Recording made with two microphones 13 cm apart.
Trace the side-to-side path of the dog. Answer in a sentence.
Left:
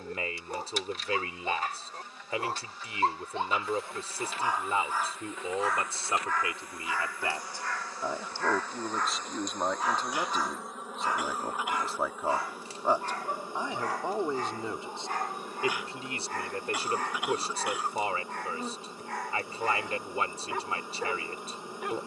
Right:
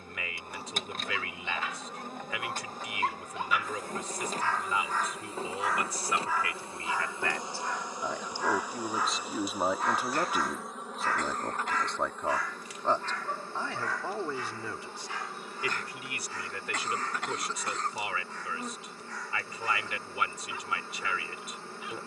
You can hear the dog go right and come back.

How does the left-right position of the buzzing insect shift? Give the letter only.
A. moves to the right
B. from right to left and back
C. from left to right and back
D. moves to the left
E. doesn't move
D.